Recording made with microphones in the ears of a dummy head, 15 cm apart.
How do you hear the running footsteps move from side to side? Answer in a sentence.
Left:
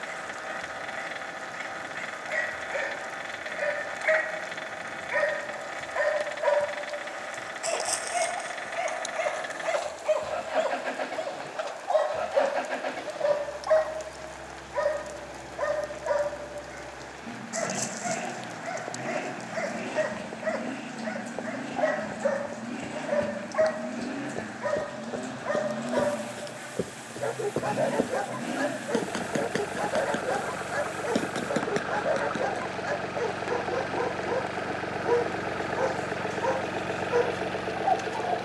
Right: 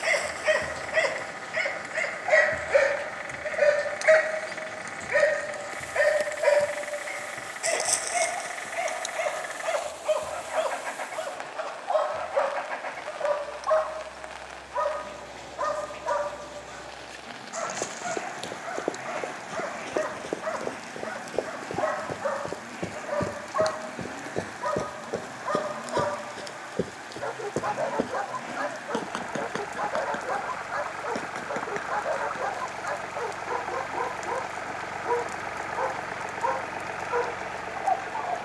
You can hear the running footsteps move from right to left.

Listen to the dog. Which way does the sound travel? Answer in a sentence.
You can hear the dog move to the left.